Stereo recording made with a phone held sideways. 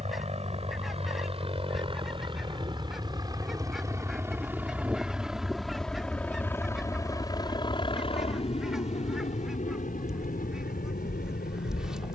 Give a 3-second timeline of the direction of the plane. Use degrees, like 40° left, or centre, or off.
40° right, 10° right, 30° left, 50° left.